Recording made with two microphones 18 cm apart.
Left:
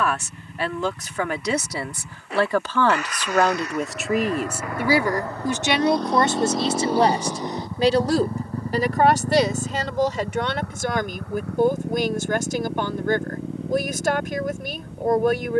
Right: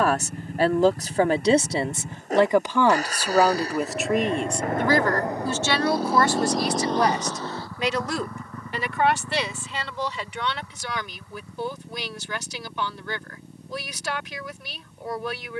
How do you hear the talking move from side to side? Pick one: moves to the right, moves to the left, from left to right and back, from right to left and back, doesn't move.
moves to the left.